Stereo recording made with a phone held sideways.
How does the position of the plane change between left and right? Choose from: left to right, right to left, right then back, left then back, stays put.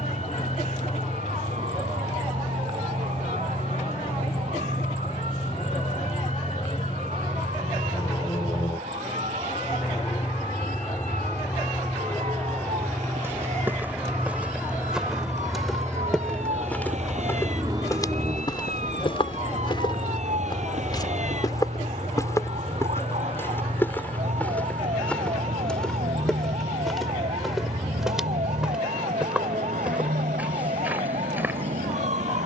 left to right.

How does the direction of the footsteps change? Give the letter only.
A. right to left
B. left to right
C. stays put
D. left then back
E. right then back
D.